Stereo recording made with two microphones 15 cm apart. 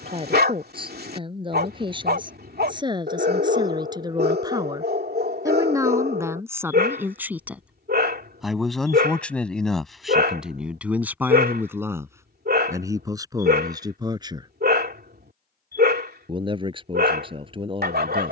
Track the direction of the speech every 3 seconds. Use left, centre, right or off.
right, right, centre, centre, right, right.